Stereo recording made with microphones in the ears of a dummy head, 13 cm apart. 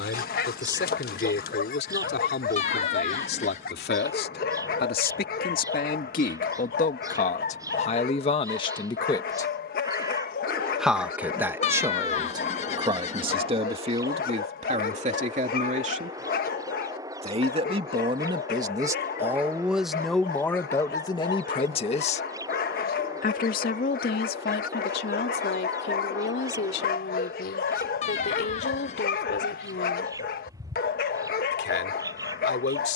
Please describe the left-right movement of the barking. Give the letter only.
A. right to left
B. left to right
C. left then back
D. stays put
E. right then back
D.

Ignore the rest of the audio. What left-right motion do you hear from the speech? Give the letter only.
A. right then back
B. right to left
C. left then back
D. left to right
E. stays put
A.